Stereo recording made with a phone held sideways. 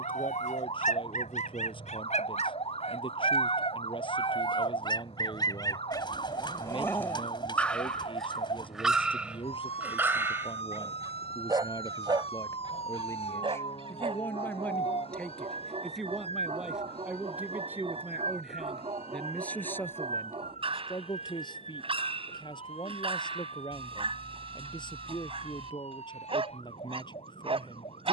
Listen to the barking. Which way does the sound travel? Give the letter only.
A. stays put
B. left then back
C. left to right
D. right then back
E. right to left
C.